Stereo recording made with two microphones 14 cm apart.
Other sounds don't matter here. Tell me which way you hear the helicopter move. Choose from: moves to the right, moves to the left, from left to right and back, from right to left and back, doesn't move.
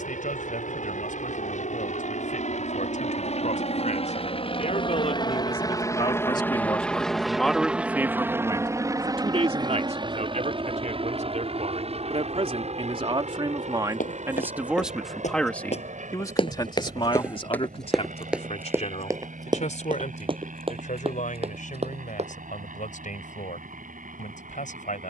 moves to the right.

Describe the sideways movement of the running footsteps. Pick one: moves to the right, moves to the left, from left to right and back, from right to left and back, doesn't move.
moves to the right.